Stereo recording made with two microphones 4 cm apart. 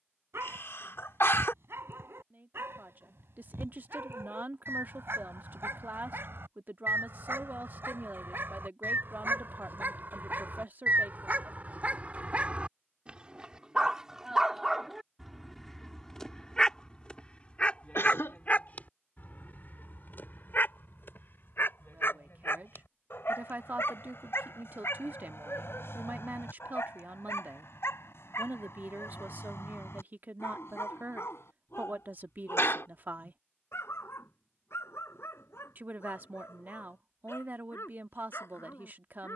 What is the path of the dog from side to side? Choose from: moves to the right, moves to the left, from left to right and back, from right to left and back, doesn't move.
moves to the left.